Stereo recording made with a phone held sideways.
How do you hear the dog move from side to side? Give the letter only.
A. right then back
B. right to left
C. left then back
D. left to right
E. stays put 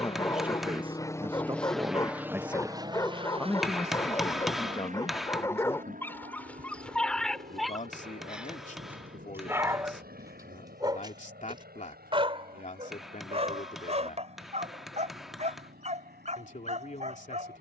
D.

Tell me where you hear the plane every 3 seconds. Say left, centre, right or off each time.
centre, right, right, right, right, right.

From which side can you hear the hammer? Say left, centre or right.
centre.